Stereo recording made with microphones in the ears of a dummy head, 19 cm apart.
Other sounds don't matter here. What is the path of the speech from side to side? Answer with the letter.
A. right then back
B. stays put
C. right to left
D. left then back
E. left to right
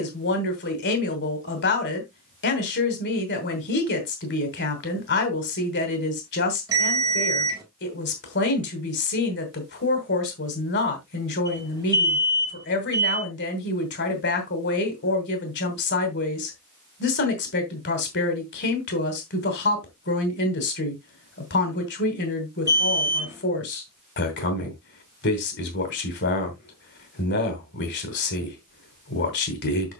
B.